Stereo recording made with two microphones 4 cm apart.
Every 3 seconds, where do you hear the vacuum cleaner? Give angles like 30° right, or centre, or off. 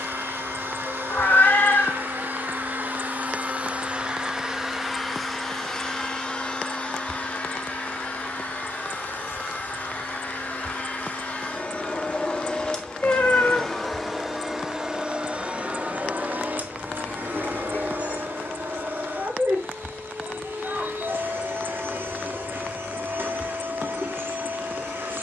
60° right, 10° right, 40° left, 40° left, 10° left, 50° right, 70° right, 70° right, 70° right.